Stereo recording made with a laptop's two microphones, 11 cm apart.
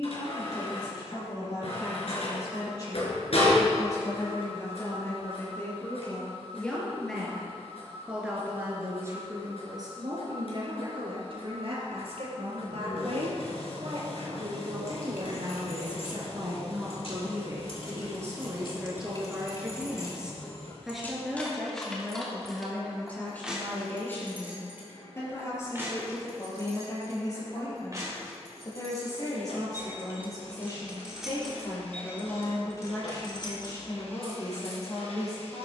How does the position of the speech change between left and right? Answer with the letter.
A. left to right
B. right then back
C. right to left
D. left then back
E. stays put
B.